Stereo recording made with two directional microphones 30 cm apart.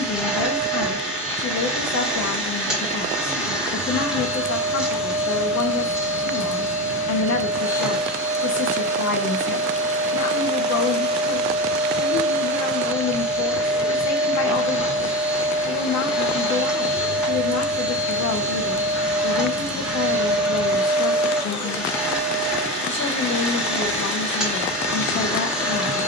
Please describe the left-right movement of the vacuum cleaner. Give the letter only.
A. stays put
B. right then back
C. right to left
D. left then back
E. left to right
A.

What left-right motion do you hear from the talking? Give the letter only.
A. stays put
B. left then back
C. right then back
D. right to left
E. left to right
A.